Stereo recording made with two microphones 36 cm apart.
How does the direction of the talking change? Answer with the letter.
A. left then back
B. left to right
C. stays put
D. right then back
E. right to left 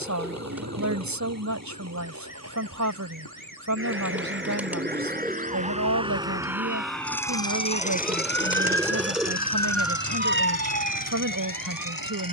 C.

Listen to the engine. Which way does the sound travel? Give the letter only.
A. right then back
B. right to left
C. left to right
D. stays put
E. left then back
B.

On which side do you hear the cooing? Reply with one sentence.
You can hear the cooing in the centre.